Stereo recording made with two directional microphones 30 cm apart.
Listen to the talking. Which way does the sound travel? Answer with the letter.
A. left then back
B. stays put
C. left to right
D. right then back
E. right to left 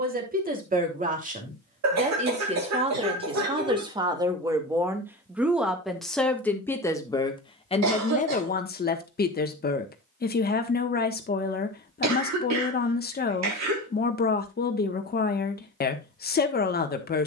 E.